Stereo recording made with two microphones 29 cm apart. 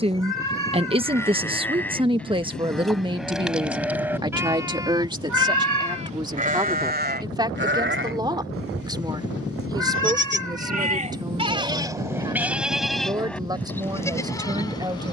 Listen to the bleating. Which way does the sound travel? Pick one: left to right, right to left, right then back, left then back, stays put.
right then back.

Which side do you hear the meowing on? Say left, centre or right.
right.